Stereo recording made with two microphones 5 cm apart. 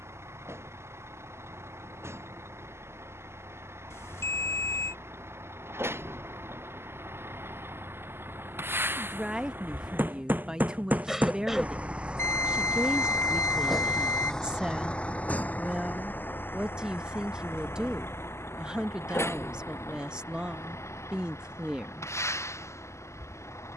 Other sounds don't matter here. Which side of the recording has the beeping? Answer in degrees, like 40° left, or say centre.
70° left.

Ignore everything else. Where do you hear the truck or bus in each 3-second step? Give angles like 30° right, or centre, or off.
70° right, 60° right, 60° right, 40° right, centre, 50° left, 70° left, 80° left.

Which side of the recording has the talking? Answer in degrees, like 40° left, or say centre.
20° right.